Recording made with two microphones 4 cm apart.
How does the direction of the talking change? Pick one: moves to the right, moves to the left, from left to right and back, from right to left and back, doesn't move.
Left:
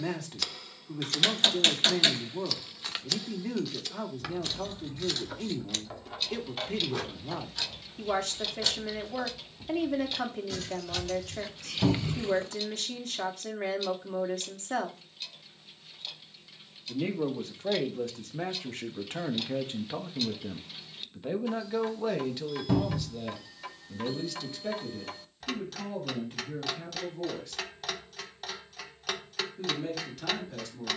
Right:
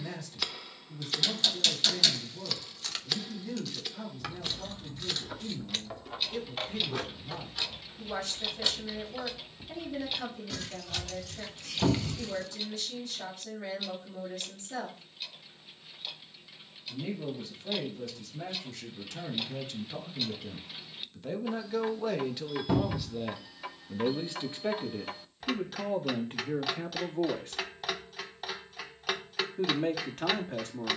moves to the right.